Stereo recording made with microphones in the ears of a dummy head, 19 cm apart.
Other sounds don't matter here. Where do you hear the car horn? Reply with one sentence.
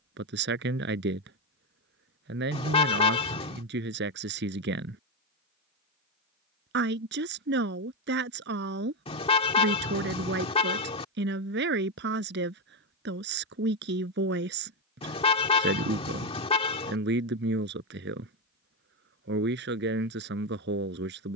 You can hear the car horn on the left.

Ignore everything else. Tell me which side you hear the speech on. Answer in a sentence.
In this clip you hear the speech on the right.